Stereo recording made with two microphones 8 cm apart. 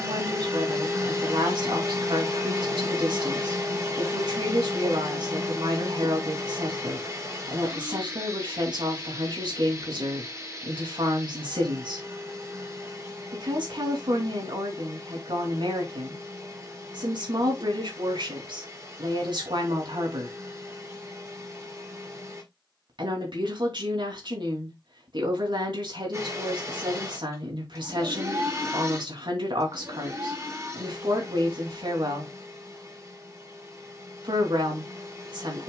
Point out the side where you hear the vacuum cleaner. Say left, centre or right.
right.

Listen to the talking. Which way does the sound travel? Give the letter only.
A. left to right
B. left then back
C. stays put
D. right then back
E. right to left
C.